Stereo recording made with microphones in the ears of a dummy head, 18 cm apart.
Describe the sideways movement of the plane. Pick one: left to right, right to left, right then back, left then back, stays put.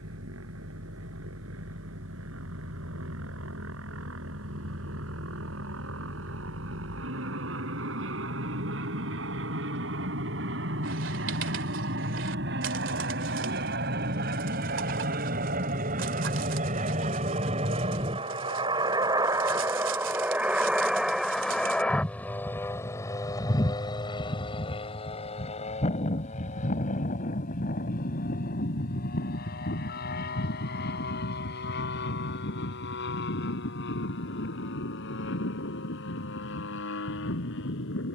right to left.